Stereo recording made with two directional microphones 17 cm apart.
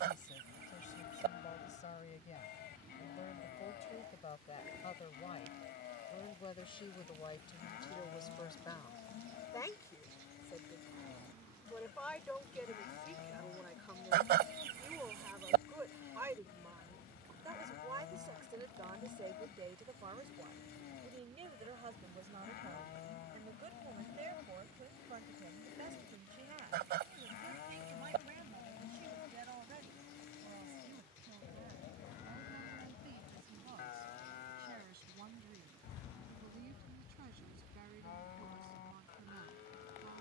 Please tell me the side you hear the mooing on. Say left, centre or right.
left.